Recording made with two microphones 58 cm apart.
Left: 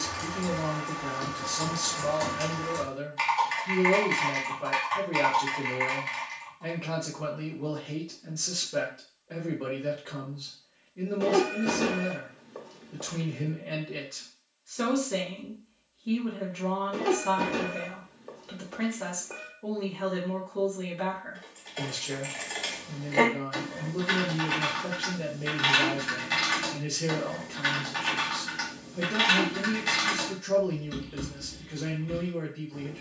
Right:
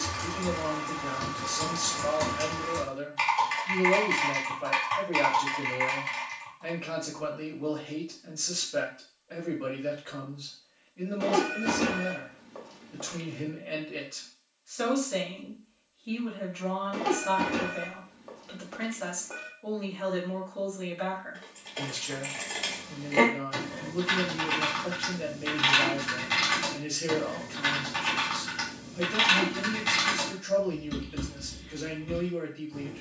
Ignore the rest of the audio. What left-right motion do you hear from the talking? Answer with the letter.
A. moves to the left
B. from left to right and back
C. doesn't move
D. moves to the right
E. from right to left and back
C.